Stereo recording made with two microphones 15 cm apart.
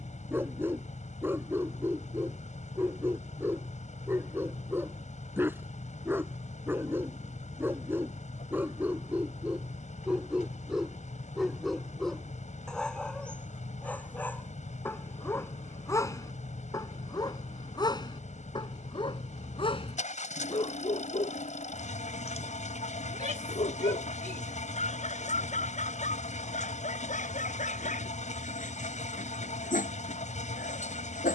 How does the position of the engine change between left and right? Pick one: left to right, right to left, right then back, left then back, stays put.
stays put.